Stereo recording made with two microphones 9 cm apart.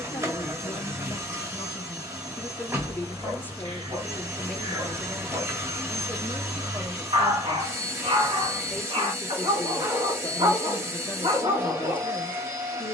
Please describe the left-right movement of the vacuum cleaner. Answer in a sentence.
In this clip you hear the vacuum cleaner stay put.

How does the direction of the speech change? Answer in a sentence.
In this clip you hear the speech move from left to right and back again.